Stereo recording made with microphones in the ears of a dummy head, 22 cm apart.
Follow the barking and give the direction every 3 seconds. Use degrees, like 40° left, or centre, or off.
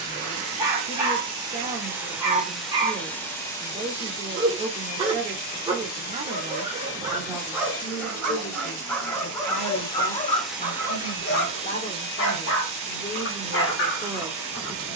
20° right, 20° right, 10° right, 30° left, 50° left.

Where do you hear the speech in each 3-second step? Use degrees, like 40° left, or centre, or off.
30° right, 30° right, centre, 40° left, 10° left.